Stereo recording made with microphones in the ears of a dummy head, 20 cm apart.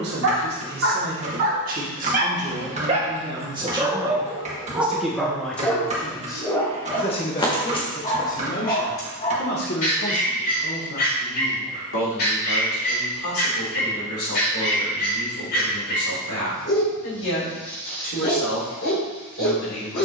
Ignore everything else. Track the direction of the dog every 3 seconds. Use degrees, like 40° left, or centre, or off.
40° right, 10° right, 20° left, 40° left, 50° left, 50° left, 50° left.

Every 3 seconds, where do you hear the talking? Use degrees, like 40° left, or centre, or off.
40° right, 10° right, 30° left, 50° left, 60° left, 70° left, 70° left.